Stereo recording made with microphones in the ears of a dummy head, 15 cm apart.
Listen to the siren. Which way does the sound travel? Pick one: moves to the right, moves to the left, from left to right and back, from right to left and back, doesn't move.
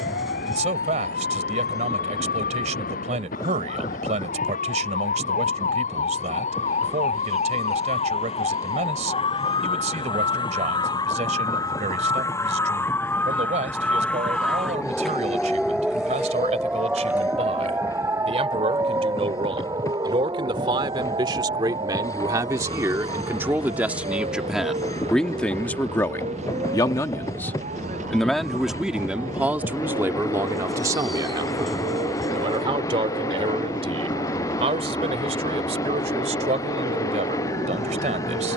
moves to the right.